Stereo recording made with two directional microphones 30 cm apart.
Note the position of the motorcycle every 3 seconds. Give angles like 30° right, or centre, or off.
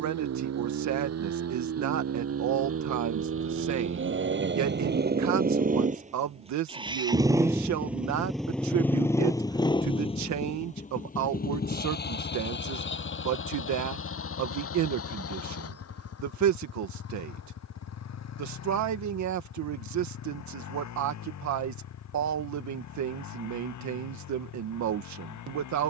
60° right, 40° right, 10° right, 20° left, 40° left, 50° left, 60° left, 60° left, 70° left.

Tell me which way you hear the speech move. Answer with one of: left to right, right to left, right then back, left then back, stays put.
stays put.